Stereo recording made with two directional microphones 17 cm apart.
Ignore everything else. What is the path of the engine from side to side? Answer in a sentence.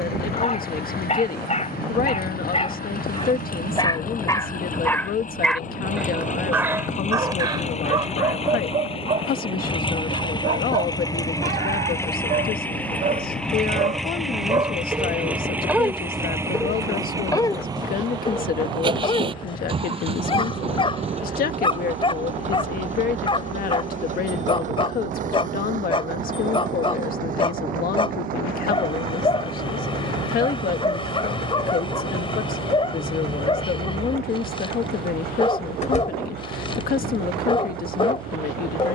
In this clip you hear the engine go from the left side to the right.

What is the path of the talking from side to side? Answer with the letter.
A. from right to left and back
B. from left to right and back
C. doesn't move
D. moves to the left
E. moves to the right
C.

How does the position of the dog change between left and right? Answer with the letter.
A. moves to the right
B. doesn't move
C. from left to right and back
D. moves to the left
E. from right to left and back
C.